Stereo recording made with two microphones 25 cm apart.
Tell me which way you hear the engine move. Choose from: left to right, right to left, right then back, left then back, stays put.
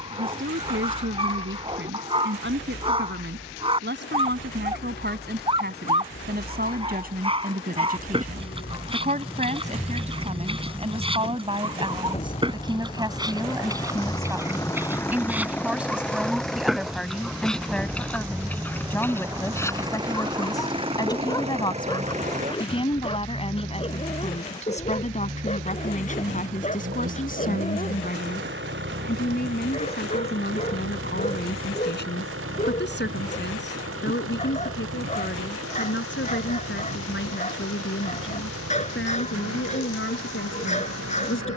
left to right.